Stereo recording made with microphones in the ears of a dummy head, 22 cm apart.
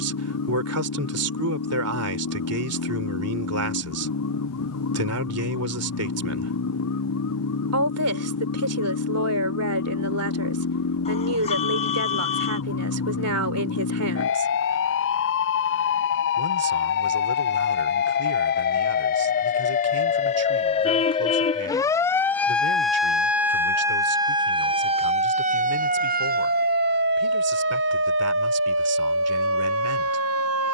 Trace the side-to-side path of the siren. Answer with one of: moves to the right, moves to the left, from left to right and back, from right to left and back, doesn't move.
moves to the right.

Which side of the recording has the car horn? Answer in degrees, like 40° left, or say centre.
30° left.